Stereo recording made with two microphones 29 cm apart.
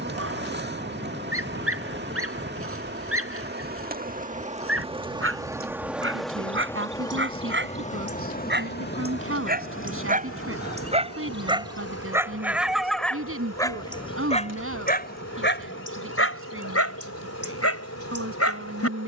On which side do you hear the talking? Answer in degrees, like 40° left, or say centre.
50° right.